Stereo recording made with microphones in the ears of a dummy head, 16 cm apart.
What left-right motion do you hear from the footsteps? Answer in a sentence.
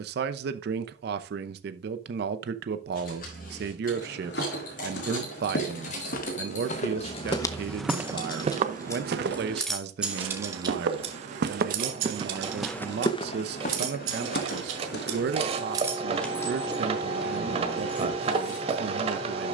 In this clip you hear the footsteps go right and come back.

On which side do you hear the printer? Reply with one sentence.
You can hear the printer on the right.